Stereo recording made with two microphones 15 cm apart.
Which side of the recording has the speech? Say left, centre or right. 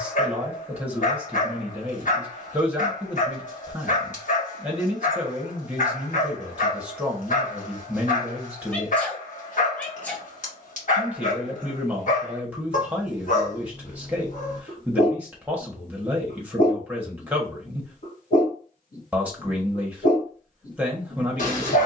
centre.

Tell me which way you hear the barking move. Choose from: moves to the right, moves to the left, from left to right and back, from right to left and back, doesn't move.
doesn't move.